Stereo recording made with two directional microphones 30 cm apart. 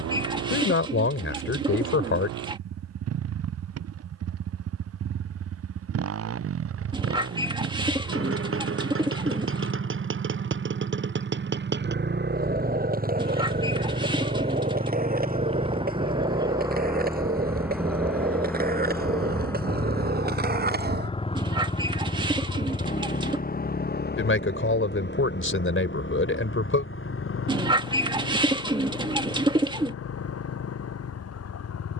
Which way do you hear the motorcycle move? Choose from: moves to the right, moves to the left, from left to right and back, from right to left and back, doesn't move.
moves to the left.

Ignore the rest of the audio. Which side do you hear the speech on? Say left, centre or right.
left.